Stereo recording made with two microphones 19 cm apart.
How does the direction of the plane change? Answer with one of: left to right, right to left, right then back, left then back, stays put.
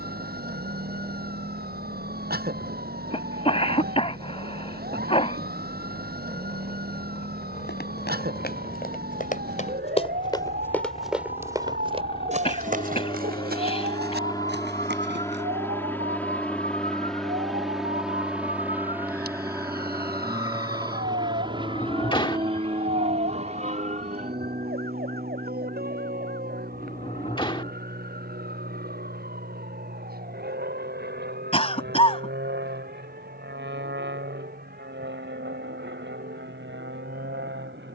left to right.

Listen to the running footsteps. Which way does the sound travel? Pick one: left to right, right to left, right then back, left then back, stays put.
left to right.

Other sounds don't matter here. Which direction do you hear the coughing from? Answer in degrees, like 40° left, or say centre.
30° left.